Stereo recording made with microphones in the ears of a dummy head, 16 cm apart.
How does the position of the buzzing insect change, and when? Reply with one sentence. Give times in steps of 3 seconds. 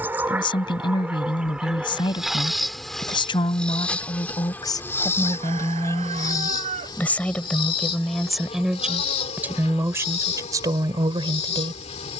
In this clip you hear the buzzing insect in the centre from 0 s and on the left from 6 s.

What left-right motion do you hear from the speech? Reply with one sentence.
In this clip you hear the speech go from the left side to the right.